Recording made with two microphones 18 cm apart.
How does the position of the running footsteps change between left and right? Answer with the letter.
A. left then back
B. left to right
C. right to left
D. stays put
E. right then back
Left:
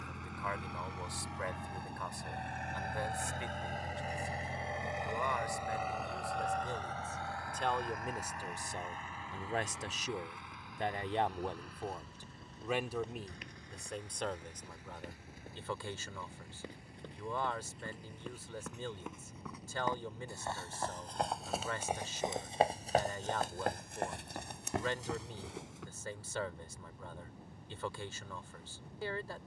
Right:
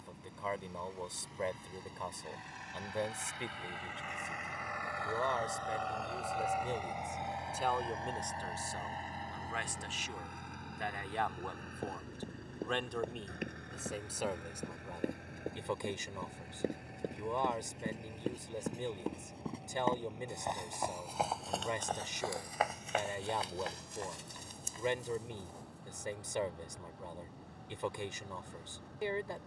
C.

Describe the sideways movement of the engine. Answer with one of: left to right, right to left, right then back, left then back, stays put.
left to right.